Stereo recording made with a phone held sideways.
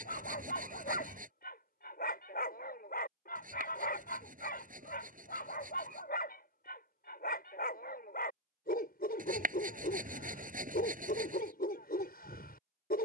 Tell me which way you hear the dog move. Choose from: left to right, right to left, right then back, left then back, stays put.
stays put.